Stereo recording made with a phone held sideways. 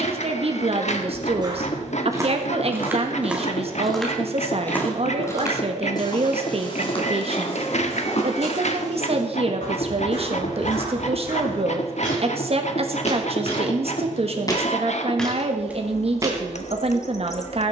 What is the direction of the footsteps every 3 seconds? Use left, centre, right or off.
right, centre, left, left, left, centre.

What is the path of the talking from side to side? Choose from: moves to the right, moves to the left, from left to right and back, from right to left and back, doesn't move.
doesn't move.